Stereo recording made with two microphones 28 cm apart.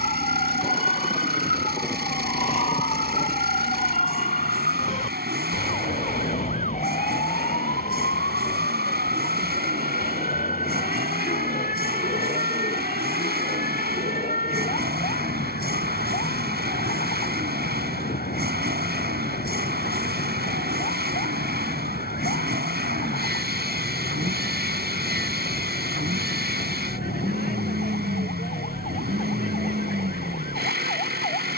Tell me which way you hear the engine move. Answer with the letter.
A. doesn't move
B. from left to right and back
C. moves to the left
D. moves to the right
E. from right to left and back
A.